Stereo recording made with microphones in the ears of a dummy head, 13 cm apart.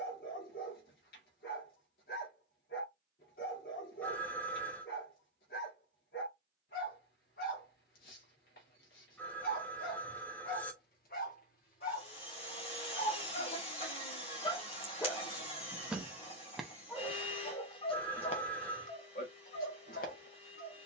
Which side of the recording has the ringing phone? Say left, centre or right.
centre.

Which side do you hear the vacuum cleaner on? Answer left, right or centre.
left.